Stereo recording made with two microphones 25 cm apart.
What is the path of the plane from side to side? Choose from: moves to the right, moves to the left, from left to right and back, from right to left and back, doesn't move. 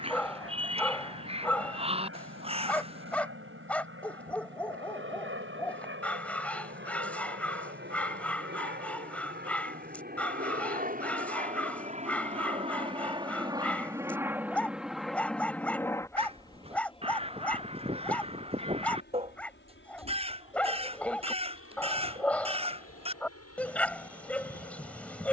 moves to the left.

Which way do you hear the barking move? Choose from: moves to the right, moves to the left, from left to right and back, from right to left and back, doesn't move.
doesn't move.